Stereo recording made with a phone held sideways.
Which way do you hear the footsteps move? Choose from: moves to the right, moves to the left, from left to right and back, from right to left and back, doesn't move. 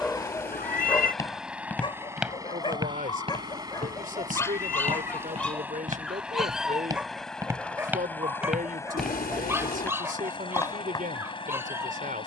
from left to right and back.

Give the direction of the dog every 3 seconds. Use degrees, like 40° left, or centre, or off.
20° left, 20° left, 10° right, 20° right.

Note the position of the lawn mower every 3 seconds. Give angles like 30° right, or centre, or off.
centre, 20° right, 10° left, 30° left.